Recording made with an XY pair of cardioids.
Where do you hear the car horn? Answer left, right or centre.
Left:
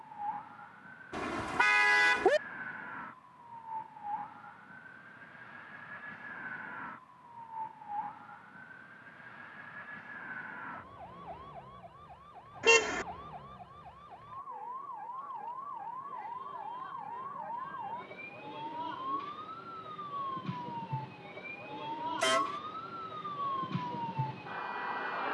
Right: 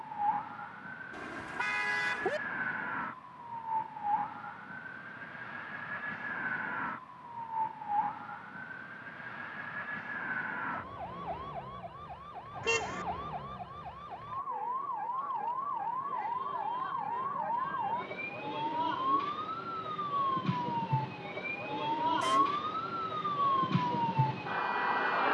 left.